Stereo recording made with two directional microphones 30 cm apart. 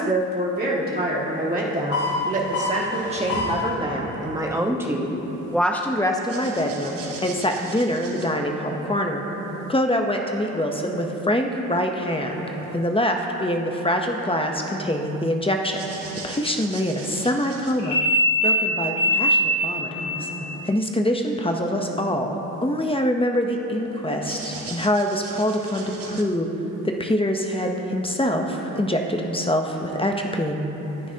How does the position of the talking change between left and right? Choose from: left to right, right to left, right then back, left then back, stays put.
right to left.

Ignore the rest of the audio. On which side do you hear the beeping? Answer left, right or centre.
left.